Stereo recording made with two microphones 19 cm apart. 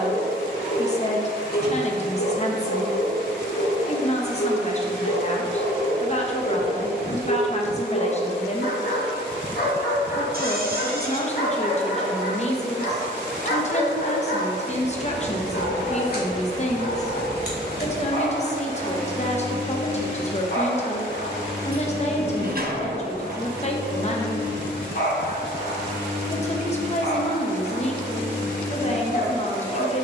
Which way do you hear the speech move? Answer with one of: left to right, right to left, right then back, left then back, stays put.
stays put.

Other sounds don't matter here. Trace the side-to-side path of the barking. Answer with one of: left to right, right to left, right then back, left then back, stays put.
stays put.